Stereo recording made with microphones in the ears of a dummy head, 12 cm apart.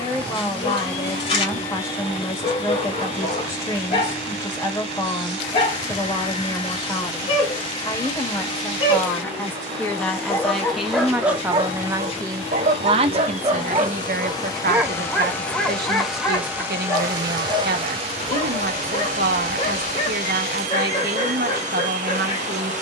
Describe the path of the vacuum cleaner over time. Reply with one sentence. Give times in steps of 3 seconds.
In this clip you hear the vacuum cleaner on the left from 0 s, in the centre from 15 s and on the right from 18 s.